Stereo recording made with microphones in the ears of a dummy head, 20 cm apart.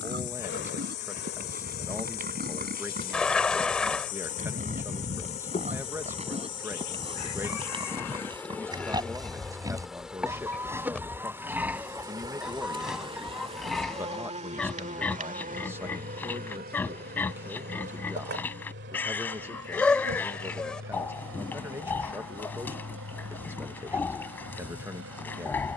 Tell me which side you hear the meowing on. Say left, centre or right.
centre.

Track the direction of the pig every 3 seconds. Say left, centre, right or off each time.
right, right, right, centre, centre, centre, centre, centre, centre.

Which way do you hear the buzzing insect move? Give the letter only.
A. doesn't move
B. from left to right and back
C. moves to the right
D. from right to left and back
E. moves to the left
C.